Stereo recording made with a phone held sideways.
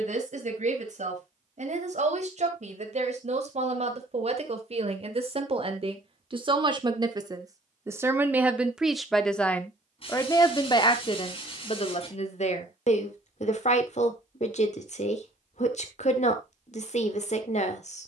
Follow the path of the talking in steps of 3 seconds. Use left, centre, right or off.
right, right, right, left, left, left.